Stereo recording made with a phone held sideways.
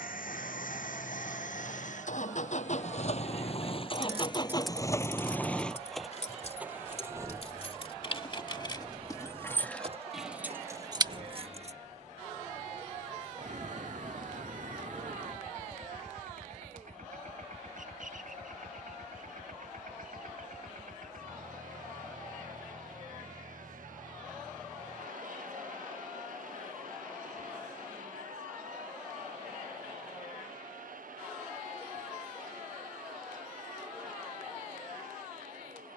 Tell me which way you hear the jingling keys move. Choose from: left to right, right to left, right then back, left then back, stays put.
left then back.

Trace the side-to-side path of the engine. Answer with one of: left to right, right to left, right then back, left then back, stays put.
left to right.